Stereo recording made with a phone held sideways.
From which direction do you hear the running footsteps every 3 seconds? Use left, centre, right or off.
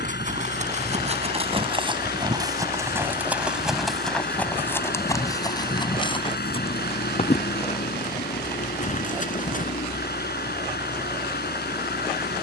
right, centre, left, left.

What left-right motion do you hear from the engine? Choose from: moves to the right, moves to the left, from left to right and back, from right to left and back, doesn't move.
doesn't move.